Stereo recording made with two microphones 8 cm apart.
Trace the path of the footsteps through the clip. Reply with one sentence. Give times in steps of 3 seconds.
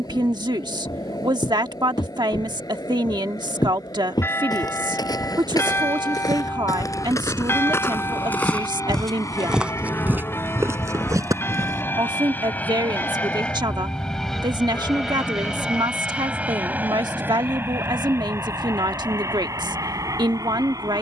In this clip you hear the footsteps on the left from 0 s, on the right from 9 s and not at all from 12 s.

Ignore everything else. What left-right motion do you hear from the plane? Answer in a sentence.
In this clip you hear the plane move to the right.